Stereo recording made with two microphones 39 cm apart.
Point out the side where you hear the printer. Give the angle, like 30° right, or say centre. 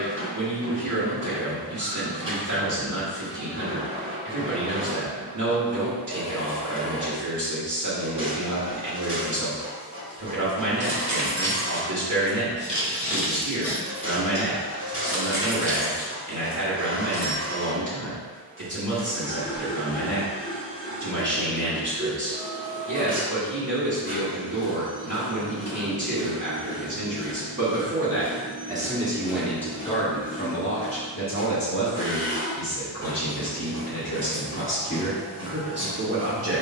30° right.